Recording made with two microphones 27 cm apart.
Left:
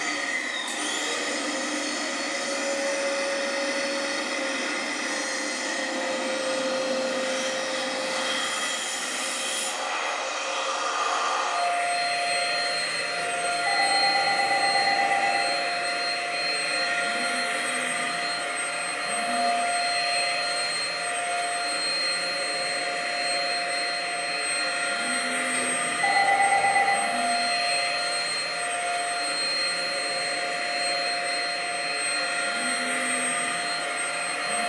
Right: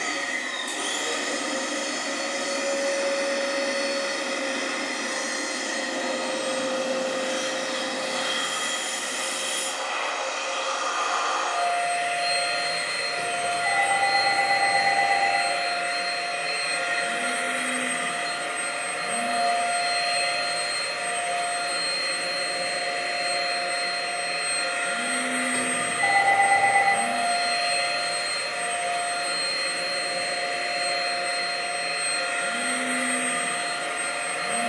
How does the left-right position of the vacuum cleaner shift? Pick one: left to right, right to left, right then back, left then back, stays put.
left then back.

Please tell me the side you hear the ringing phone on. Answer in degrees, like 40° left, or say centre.
60° right.